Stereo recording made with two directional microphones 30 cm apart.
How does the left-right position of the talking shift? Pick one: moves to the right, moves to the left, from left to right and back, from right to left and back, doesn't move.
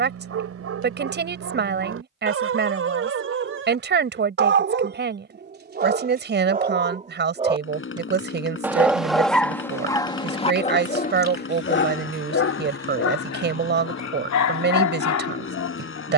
doesn't move.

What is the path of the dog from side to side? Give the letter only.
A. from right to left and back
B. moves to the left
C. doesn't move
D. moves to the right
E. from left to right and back
B.